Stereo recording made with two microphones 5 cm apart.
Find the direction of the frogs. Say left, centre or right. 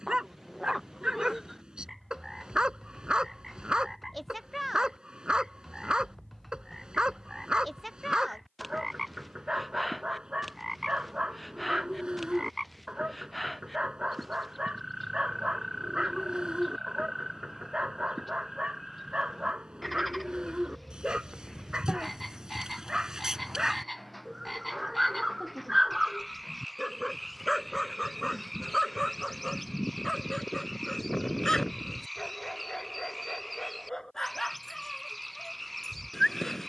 centre.